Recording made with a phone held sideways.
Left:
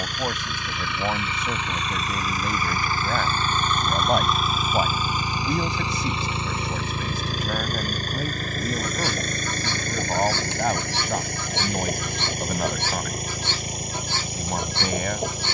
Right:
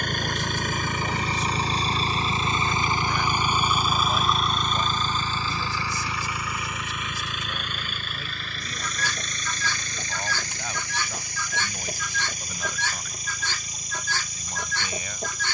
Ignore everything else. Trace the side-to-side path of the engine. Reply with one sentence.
In this clip you hear the engine move to the left.